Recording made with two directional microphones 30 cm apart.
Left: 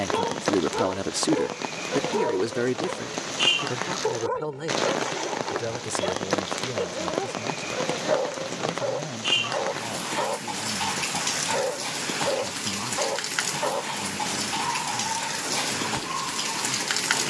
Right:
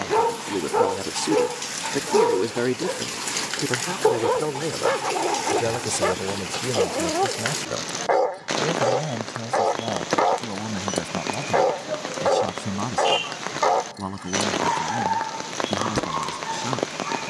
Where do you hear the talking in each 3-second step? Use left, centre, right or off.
centre, right, right, right, right, right.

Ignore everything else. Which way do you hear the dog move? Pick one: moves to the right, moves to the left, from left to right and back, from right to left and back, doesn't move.
doesn't move.